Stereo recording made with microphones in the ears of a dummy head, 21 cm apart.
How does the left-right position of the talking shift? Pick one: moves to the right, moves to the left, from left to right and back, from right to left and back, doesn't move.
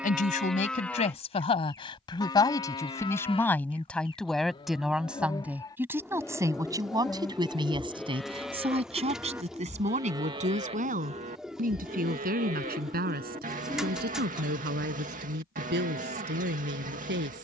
moves to the right.